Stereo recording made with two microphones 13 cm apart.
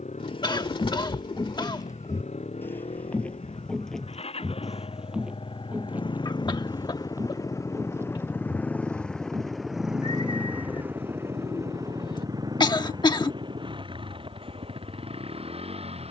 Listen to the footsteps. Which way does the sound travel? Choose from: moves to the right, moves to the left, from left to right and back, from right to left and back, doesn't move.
moves to the right.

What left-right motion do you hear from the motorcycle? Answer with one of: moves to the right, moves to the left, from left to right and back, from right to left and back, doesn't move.
moves to the right.